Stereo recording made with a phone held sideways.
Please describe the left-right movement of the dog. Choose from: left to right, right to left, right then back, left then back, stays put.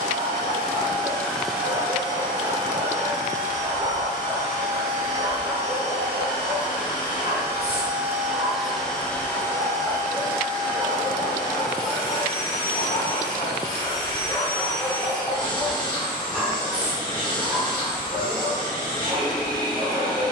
left then back.